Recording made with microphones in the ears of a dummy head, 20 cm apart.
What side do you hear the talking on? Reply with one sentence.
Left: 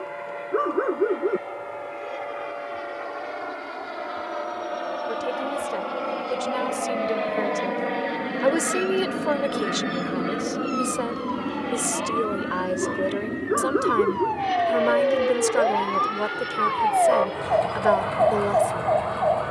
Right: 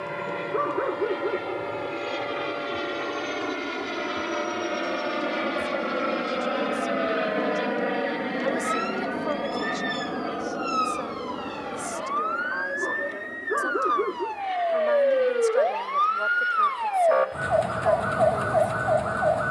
In this clip you hear the talking on the left.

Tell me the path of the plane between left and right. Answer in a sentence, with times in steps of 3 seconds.
You can hear the plane on the right from 0 s, in the centre from 6 s and on the left from 9 s.